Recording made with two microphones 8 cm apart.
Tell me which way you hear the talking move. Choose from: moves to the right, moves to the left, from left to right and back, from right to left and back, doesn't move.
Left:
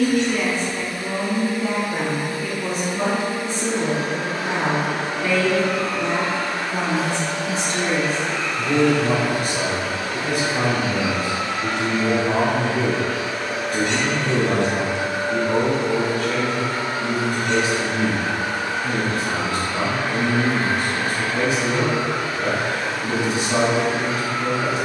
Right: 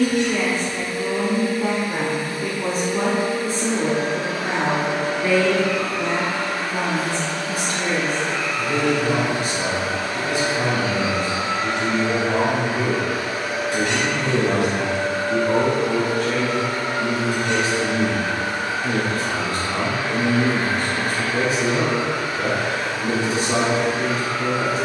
from right to left and back.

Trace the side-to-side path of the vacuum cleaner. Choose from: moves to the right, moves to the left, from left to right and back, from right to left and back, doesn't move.
from left to right and back.